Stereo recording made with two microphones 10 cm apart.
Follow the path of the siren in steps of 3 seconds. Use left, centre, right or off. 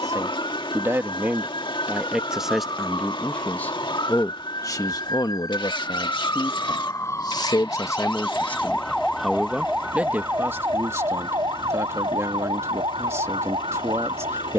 left, left, left, right, right.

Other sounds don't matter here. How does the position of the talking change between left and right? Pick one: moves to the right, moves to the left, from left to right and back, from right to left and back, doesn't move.
from right to left and back.